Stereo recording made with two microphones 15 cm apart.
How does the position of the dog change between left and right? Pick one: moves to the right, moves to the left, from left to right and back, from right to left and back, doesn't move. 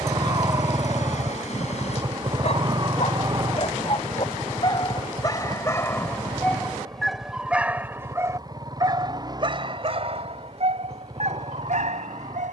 moves to the right.